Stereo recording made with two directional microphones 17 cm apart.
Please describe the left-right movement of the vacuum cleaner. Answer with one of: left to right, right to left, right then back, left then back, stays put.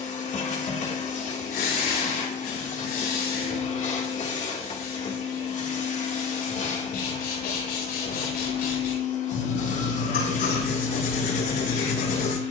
stays put.